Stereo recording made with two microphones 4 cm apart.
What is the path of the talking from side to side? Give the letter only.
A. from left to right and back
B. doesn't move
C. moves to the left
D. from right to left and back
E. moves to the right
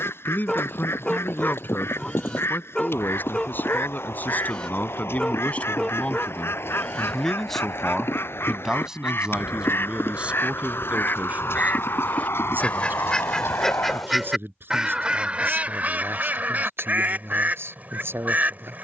E.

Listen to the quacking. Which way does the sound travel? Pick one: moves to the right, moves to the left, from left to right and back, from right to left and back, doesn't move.
moves to the right.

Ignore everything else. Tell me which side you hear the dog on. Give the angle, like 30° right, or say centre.
20° left.